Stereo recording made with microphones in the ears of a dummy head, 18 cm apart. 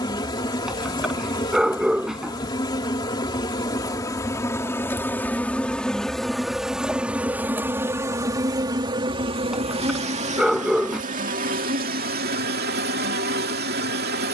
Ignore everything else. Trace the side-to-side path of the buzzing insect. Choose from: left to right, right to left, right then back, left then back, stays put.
left to right.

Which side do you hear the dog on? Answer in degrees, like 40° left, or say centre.
centre.